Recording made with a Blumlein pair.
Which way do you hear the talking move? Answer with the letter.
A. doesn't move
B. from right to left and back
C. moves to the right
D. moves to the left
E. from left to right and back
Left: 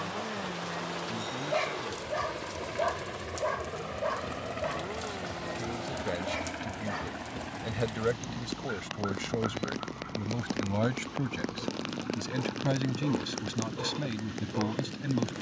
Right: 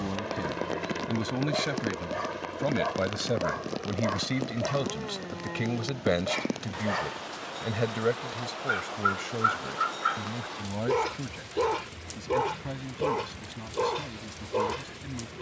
D.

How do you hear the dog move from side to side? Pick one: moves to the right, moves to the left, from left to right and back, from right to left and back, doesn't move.
moves to the right.